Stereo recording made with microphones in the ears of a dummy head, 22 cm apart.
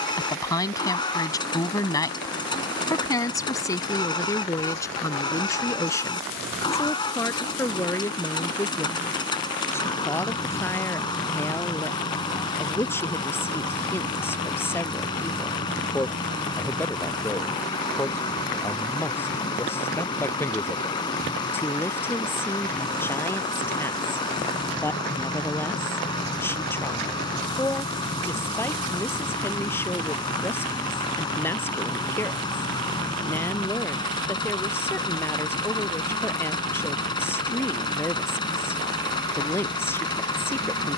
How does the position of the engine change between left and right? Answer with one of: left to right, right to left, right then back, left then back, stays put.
stays put.